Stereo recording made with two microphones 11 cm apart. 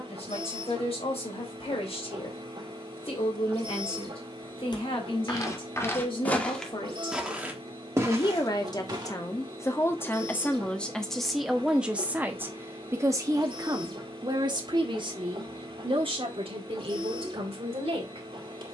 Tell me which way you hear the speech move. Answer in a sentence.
You can hear the speech go from the left side to the right.